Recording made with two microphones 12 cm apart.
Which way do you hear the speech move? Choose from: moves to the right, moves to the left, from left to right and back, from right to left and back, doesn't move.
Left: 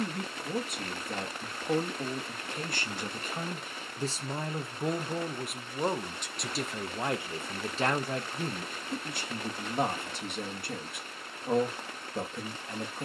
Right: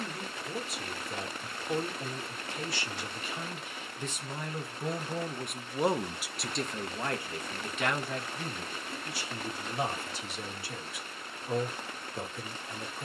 from left to right and back.